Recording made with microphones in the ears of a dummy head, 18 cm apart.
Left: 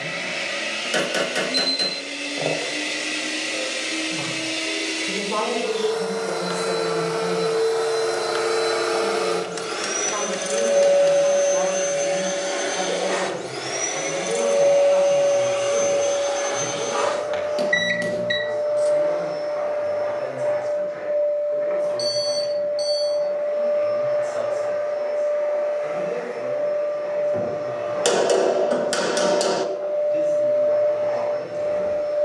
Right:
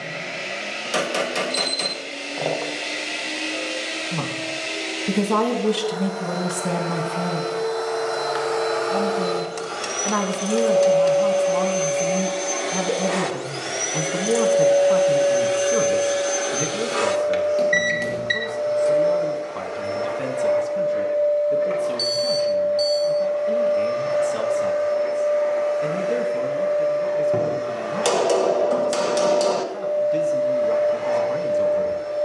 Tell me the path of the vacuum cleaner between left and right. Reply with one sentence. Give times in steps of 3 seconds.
You can hear the vacuum cleaner on the left from 0 s, in the centre from 12 s and on the right from 15 s.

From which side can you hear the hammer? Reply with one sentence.
In this clip you hear the hammer in the centre.